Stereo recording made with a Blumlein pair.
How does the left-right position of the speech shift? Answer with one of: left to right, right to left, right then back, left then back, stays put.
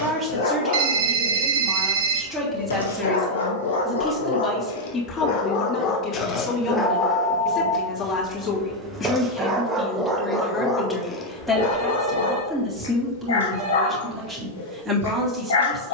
left then back.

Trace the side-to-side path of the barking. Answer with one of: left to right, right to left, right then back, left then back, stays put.
right then back.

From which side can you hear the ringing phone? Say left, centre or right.
right.